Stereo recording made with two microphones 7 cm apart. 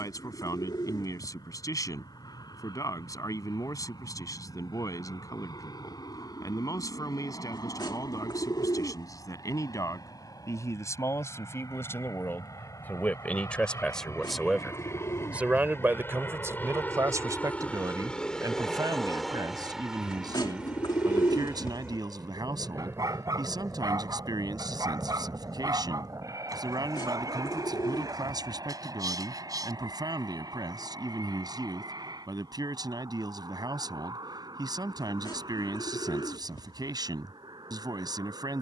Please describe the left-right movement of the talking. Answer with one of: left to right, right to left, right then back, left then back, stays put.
left to right.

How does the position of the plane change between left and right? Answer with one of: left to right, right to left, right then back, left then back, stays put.
left to right.